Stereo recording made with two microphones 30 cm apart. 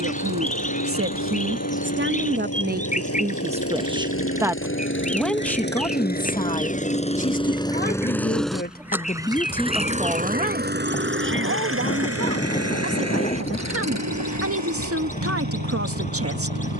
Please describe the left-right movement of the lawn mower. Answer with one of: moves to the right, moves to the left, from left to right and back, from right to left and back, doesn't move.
moves to the right.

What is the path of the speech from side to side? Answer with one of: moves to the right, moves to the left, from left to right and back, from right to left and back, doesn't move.
from right to left and back.